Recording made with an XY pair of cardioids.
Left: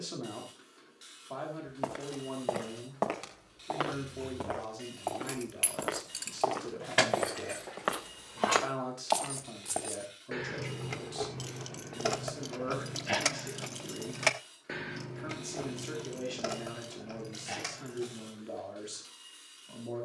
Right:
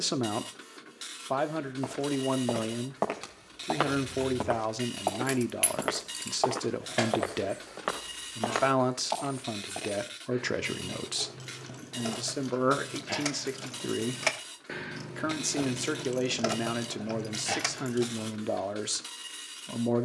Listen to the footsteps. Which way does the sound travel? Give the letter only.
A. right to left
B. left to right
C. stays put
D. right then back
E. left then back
D.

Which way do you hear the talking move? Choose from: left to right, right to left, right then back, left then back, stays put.
stays put.